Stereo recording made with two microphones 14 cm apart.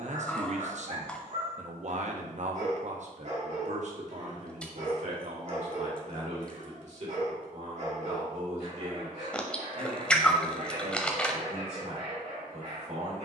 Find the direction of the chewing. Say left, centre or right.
centre.